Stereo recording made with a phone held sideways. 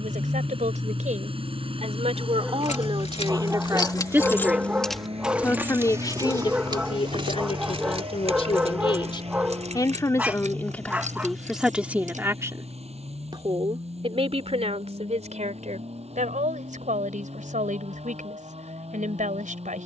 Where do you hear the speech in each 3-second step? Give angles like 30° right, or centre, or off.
50° right, 10° right, 40° left, 10° left, 30° right, 60° right, 60° right.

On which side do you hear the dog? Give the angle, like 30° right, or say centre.
10° right.